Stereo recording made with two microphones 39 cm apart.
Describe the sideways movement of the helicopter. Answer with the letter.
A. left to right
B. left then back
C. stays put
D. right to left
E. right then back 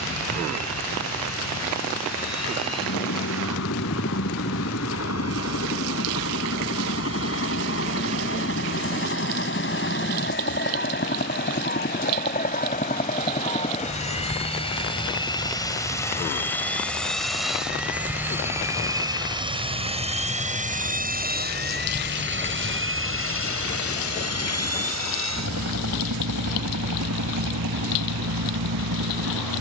A.